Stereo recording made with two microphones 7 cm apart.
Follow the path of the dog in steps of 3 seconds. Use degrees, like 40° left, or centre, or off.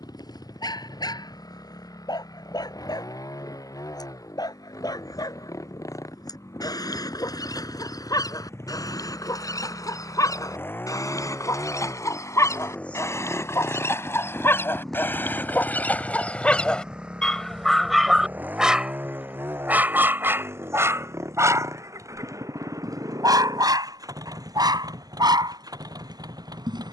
60° left, 60° left, 60° left, 50° left, 40° left, 10° left, 20° right, 50° right, 70° right.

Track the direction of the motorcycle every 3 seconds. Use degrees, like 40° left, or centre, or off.
60° left, 50° left, 40° left, 30° left, 10° left, 10° right, 30° right, 50° right, 60° right.